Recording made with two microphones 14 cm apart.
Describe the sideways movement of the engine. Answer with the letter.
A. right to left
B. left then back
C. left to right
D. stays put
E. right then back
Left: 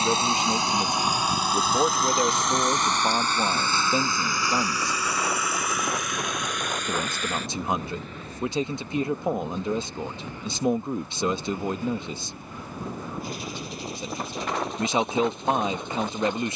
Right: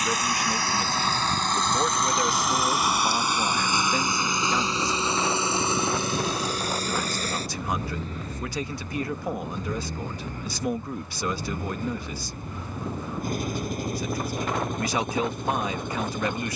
C.